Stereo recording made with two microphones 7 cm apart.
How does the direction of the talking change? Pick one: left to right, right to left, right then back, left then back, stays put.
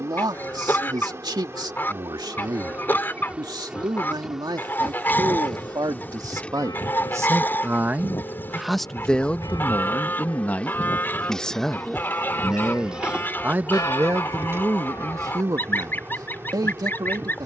left then back.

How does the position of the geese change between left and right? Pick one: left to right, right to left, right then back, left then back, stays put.
stays put.